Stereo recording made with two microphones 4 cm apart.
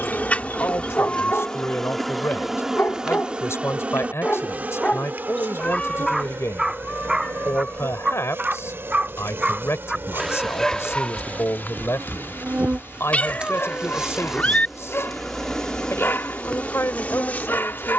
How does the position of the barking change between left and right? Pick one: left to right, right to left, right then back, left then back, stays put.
right then back.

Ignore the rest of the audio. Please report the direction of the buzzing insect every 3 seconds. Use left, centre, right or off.
centre, right, right, right, right, left.